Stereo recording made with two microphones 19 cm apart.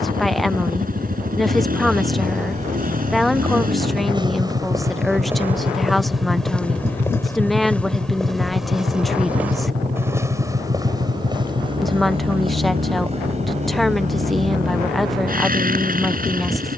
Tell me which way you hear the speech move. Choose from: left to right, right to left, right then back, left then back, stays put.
stays put.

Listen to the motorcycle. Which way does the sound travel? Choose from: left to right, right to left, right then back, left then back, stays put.
stays put.